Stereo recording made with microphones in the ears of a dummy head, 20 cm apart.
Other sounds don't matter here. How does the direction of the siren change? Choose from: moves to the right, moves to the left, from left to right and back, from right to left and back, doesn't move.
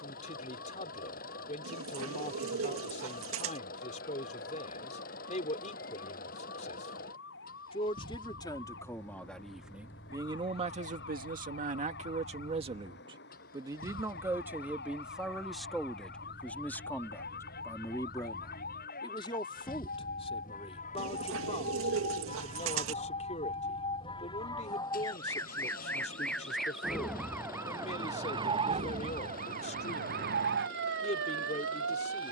moves to the right.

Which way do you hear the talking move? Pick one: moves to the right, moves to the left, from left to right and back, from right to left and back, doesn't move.
from left to right and back.